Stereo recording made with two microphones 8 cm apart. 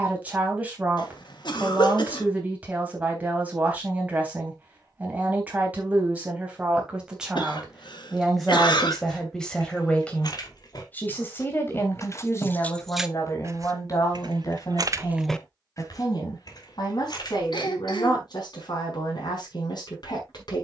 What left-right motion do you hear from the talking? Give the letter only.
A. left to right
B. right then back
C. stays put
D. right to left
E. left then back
D.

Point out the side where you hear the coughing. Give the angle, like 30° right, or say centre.
80° left.